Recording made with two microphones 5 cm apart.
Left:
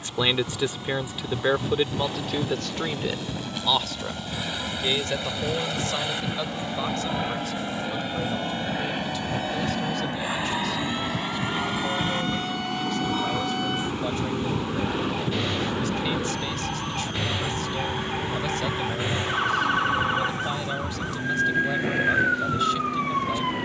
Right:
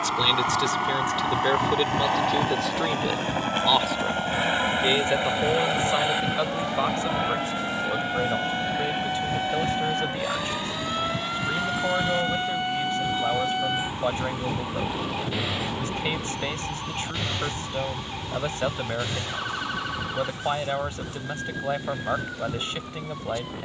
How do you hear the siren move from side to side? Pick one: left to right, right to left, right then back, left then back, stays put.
right to left.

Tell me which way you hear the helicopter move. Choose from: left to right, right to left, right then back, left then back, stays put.
right to left.